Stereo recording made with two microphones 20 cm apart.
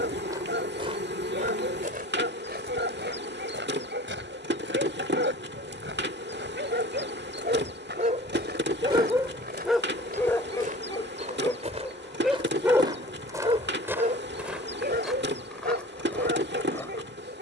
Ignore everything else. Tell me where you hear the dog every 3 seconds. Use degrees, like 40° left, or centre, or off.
70° right, 70° right, 50° right, 10° left, 30° right, 60° right.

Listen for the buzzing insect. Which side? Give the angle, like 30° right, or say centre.
60° right.